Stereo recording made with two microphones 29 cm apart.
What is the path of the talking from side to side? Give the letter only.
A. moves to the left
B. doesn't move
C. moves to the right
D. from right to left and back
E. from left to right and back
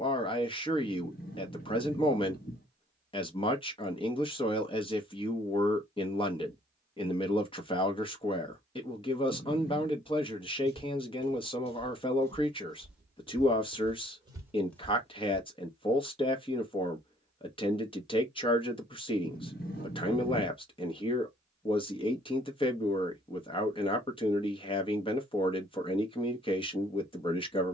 B.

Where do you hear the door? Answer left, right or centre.
left.